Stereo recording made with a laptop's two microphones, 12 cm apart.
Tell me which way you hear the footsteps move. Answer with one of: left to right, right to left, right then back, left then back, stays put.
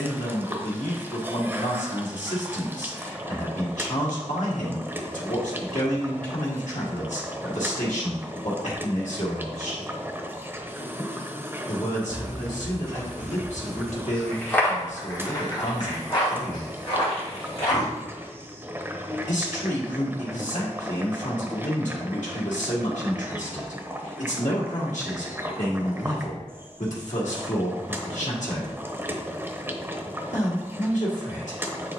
right to left.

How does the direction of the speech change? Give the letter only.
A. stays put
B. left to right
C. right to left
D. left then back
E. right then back
A.